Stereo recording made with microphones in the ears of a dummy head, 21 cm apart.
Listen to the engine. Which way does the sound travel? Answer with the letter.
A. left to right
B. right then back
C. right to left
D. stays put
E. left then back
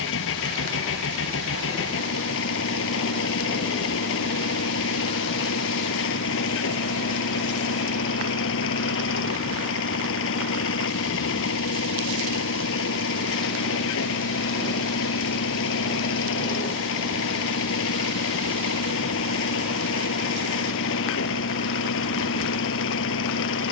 D.